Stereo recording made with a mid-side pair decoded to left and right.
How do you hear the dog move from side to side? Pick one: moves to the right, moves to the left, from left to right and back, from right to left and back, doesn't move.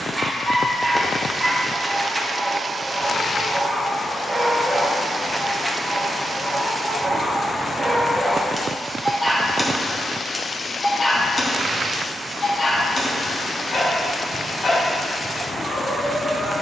moves to the left.